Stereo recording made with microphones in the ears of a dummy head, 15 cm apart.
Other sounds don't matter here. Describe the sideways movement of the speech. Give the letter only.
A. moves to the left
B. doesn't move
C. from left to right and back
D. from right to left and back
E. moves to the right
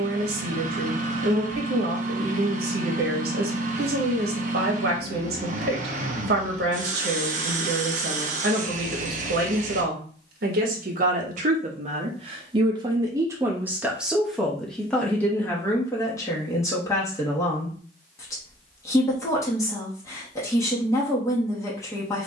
A.